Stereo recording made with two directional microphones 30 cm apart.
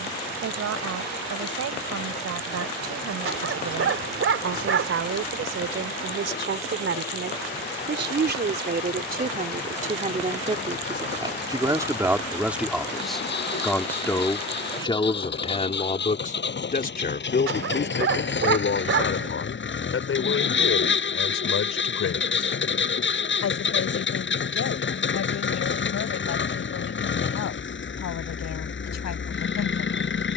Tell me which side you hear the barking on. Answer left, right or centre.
right.